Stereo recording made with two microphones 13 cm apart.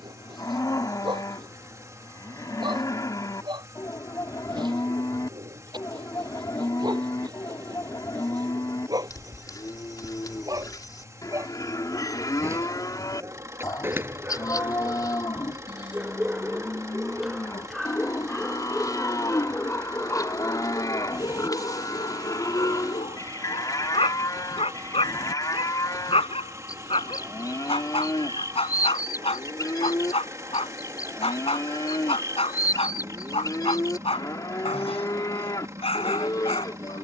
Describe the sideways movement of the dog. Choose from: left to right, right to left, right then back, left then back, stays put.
right to left.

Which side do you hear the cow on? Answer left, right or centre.
left.